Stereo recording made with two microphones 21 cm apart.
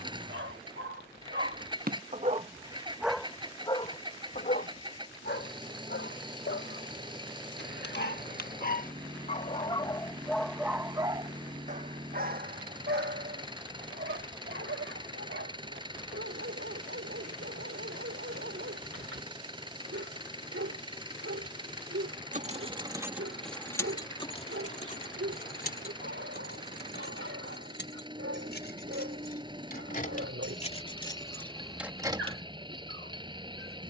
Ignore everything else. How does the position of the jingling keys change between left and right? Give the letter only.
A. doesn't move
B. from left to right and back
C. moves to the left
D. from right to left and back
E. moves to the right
D.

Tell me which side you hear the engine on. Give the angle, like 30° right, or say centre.
20° right.